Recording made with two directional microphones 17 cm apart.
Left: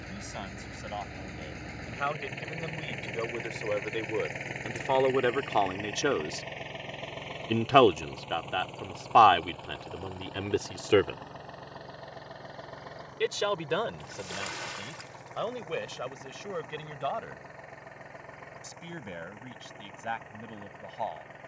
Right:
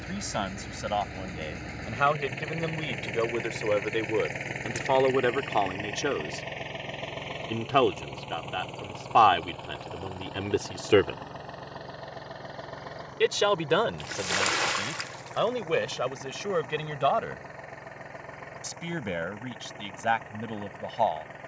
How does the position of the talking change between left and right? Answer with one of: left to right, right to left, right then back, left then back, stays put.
left then back.